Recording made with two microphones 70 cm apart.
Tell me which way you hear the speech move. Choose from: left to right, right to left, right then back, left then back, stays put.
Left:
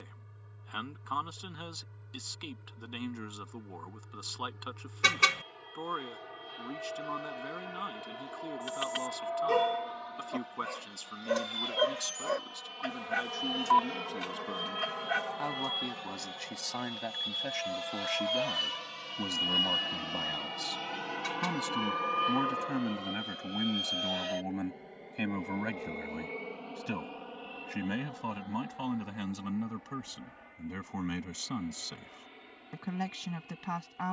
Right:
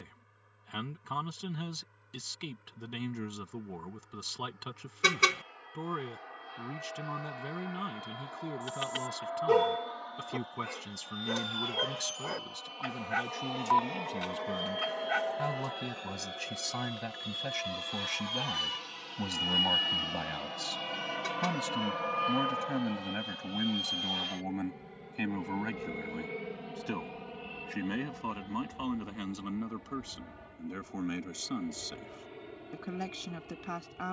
right to left.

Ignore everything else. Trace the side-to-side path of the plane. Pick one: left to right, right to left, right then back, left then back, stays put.
left to right.